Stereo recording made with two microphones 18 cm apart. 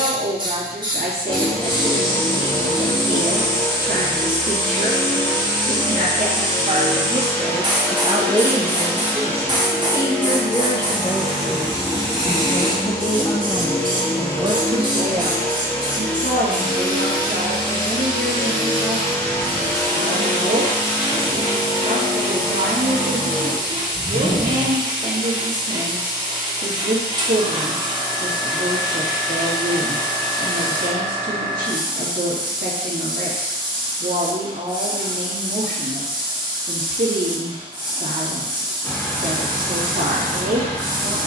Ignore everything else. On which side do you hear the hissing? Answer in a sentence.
You can hear the hissing on the right.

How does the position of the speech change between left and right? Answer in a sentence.
You can hear the speech move from right to left and back again.